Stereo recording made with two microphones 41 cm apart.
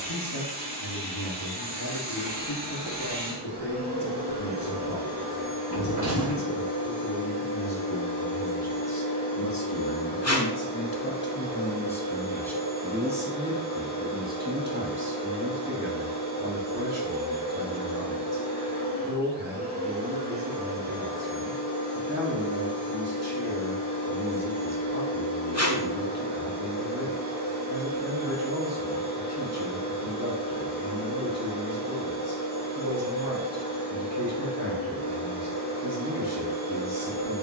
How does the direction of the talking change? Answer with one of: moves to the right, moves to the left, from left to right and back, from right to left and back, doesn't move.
moves to the right.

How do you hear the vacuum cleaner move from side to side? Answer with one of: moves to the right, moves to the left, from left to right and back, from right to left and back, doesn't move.
doesn't move.